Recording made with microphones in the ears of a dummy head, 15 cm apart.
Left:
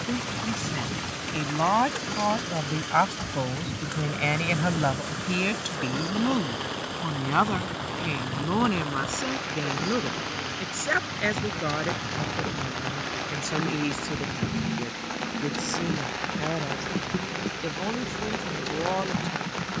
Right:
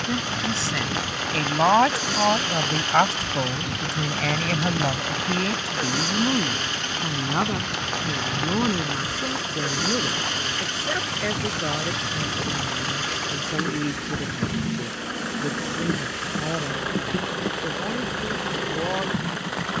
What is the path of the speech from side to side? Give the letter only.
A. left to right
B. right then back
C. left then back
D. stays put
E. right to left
E.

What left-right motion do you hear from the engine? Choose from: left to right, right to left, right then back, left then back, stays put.
stays put.